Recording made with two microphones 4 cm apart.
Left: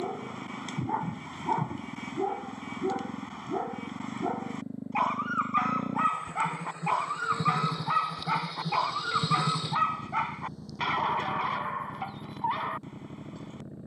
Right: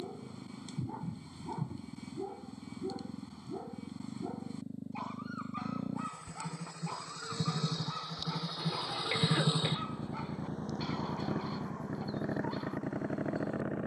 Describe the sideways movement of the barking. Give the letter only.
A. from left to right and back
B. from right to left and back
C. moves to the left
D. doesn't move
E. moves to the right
D.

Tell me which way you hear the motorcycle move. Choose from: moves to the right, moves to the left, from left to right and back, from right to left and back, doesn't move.
moves to the right.